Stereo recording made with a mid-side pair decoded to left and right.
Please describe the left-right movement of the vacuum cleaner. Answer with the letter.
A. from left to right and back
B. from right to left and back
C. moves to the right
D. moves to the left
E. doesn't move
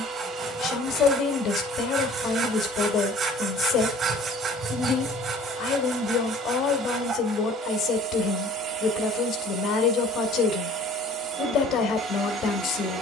E.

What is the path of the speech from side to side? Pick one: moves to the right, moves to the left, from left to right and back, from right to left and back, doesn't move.
doesn't move.